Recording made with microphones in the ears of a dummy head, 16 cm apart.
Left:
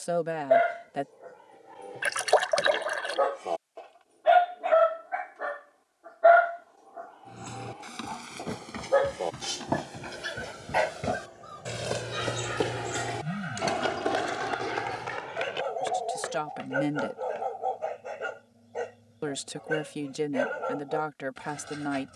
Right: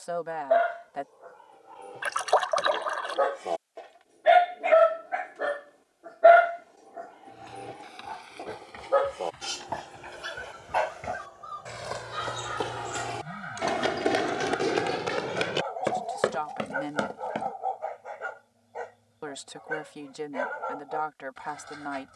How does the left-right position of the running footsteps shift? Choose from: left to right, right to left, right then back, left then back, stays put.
left to right.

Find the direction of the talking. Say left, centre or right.
left.